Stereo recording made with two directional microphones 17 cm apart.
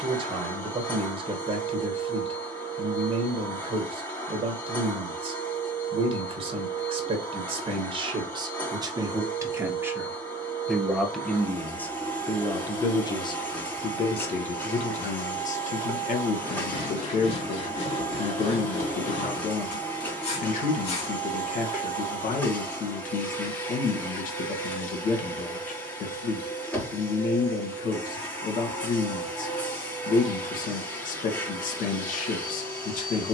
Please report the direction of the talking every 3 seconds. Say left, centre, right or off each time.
right, right, right, centre, left, left, left, left, left, left, left.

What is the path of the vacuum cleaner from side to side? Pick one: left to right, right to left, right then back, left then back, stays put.
stays put.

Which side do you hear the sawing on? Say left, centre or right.
left.